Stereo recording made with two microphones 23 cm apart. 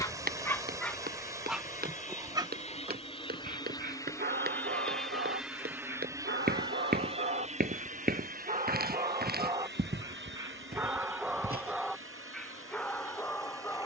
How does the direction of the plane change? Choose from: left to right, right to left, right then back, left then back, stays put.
left to right.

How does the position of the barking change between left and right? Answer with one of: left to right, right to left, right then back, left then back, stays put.
right then back.